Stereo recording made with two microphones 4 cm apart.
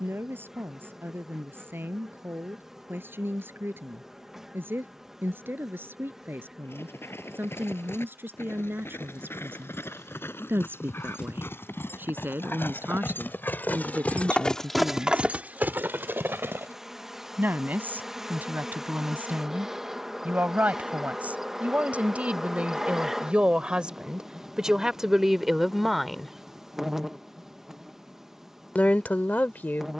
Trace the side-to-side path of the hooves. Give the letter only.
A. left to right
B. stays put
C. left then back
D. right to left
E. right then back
A.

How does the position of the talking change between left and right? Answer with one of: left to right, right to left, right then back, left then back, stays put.
right to left.